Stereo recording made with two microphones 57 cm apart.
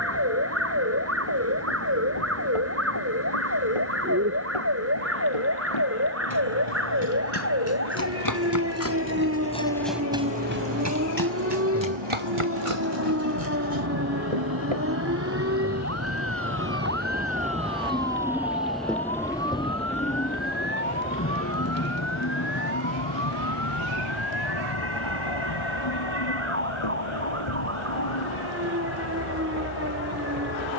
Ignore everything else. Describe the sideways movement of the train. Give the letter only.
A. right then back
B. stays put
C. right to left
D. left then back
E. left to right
C.